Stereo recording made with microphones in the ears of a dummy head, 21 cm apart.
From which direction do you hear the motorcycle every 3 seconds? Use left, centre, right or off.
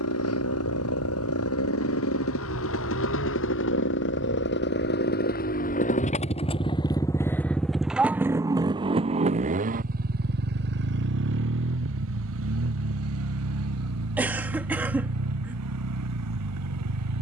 left, left, centre, right, right, right.